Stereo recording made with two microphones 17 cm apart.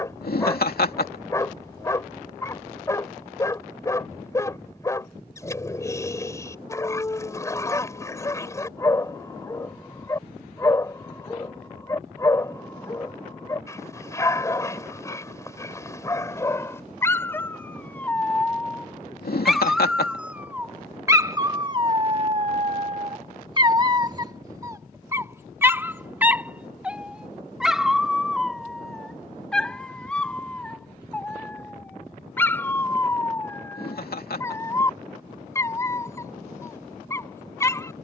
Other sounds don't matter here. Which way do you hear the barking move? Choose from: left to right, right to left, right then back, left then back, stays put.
right then back.